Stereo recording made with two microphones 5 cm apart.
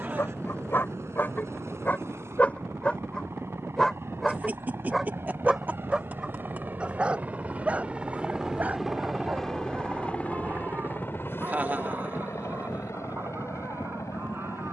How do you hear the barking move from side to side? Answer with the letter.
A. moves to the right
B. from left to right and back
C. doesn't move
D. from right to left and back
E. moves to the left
A.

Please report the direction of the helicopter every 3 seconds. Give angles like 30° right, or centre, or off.
70° right, 60° right, 30° right, 30° left, 60° left.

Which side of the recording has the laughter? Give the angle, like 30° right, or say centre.
30° right.